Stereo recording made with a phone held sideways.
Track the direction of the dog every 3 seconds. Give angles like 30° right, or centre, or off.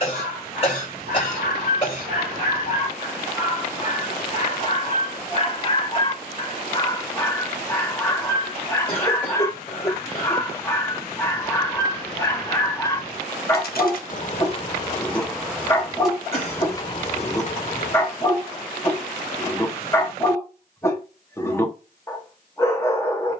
50° left, 40° left, 20° left, 20° left, 20° left, 20° left, 20° left, 20° left.